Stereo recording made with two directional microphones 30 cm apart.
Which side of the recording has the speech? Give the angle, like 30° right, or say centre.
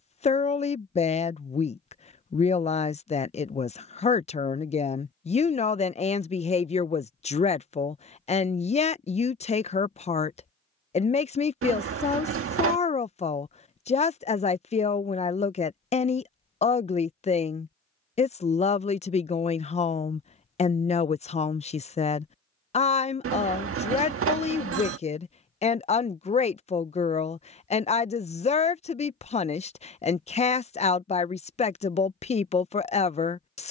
20° left.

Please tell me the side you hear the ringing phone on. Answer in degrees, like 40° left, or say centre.
50° right.